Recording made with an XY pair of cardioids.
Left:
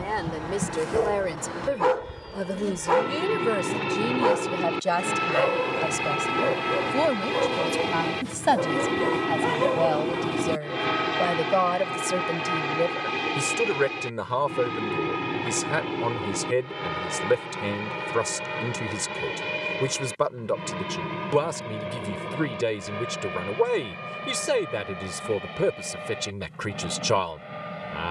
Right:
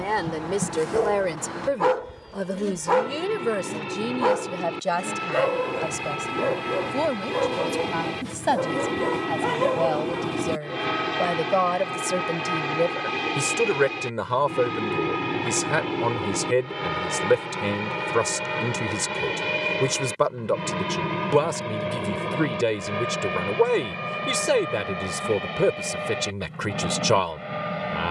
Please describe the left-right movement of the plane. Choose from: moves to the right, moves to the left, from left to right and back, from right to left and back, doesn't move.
moves to the right.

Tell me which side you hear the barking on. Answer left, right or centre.
centre.